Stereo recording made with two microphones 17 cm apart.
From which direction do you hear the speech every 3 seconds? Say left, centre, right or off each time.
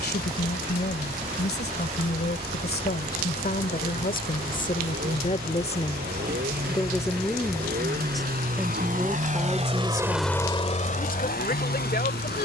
left, left, centre, left.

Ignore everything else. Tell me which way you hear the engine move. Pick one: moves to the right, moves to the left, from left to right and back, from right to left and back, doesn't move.
moves to the left.